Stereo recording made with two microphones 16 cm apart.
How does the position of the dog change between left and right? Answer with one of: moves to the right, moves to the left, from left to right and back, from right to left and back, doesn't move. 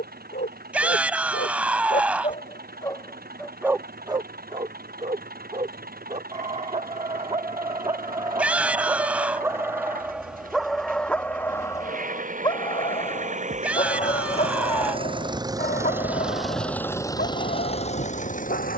from left to right and back.